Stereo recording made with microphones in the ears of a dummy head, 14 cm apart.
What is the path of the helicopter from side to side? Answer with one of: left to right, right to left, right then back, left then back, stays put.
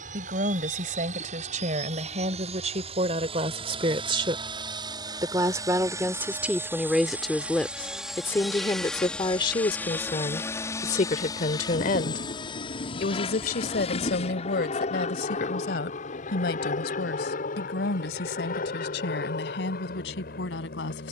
right to left.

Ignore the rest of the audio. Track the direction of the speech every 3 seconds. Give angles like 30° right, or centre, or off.
50° right, 30° right, centre, 40° left, 60° left, 70° left, 80° left.